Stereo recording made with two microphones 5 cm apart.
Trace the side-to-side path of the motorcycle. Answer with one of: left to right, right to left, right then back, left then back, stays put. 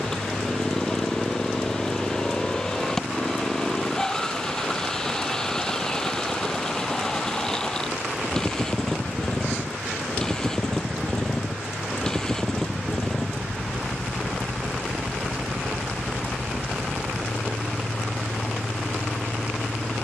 stays put.